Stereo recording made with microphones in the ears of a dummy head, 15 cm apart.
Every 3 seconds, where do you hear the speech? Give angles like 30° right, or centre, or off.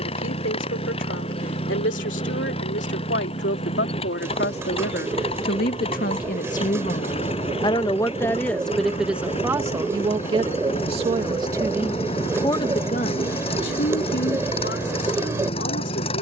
80° left, 70° left, 30° left, 20° right, 60° left, 80° left.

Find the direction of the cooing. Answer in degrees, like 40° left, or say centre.
20° right.